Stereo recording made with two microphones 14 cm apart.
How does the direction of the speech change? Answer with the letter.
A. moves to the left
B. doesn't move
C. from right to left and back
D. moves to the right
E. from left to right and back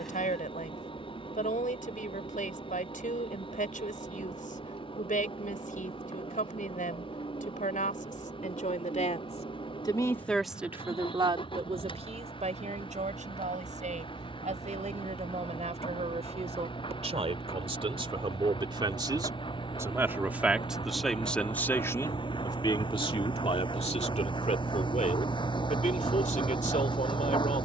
E.